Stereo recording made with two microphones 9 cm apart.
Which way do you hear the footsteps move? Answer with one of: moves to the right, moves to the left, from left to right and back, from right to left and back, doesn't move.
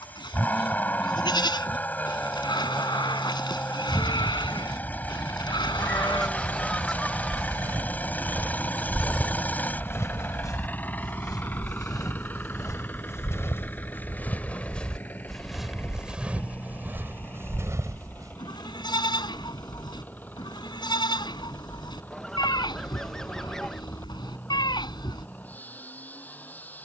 from right to left and back.